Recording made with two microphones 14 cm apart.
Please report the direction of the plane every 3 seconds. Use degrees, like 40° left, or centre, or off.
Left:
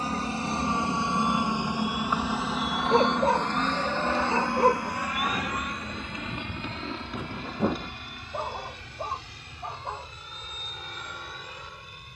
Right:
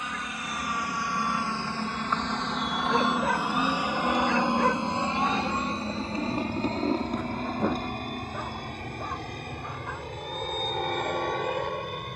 20° left, 20° right, 40° right, 50° right.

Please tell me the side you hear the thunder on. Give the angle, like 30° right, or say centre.
10° left.